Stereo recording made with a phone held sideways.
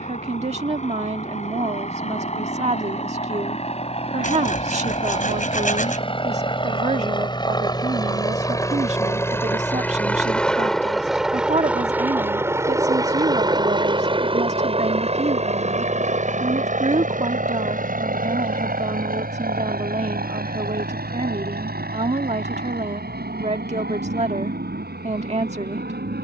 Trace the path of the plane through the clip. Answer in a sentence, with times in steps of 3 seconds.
In this clip you hear the plane on the left from 0 s, in the centre from 9 s and on the right from 12 s.